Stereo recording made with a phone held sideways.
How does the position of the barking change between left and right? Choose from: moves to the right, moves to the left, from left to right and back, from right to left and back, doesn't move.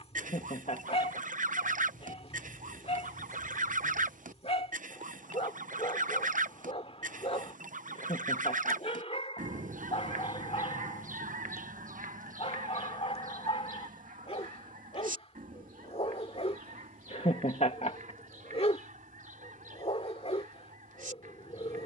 doesn't move.